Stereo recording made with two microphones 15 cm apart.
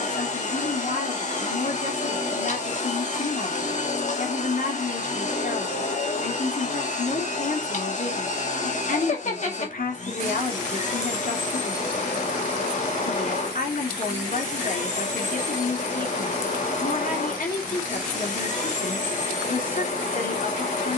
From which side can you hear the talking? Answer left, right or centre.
left.